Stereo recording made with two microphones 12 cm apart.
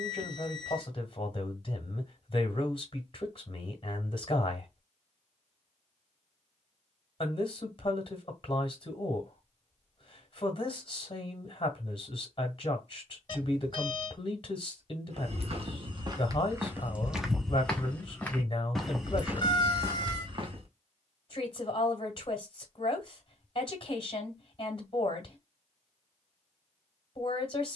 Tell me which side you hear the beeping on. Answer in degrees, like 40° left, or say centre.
40° left.